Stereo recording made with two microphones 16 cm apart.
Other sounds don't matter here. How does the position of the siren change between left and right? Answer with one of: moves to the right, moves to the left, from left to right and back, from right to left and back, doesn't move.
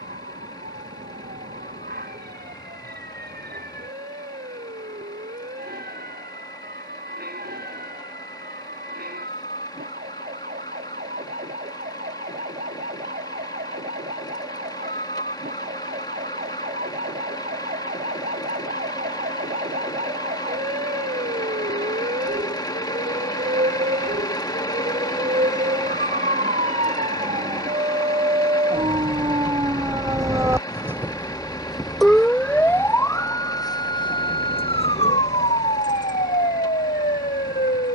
moves to the left.